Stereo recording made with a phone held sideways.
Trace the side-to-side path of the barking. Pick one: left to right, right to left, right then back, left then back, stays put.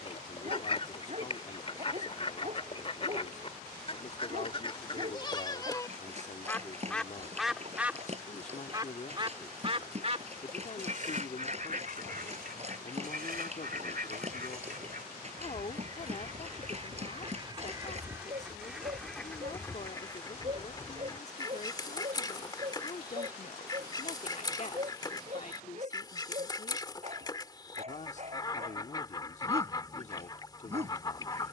stays put.